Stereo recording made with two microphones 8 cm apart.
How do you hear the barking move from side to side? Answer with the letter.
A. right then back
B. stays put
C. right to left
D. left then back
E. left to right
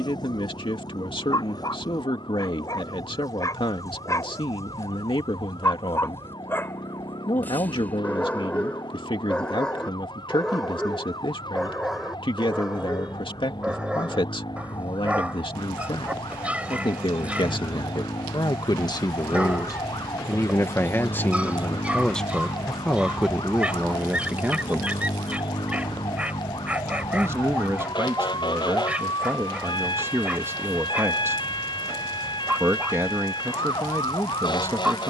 E.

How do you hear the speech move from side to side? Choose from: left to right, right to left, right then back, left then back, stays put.
left to right.